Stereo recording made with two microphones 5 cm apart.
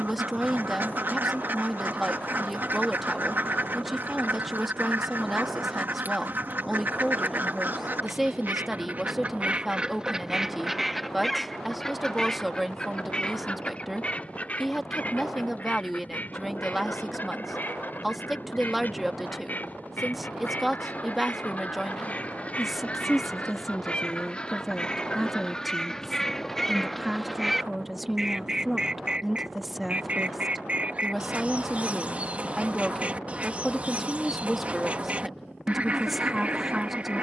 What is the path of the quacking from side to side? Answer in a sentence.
In this clip you hear the quacking move from right to left and back again.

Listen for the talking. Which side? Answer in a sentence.
In this clip you hear the talking in the centre.